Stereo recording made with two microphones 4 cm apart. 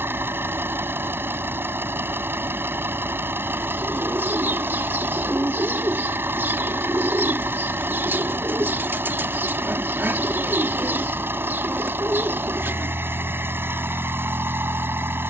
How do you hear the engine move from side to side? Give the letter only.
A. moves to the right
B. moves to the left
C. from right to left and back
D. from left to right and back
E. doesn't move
E.